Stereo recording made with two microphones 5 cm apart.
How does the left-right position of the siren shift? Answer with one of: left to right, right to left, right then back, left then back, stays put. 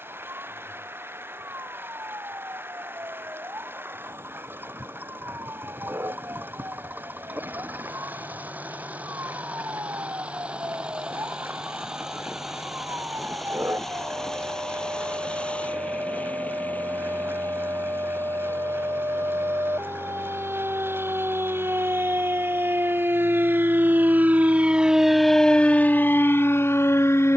right to left.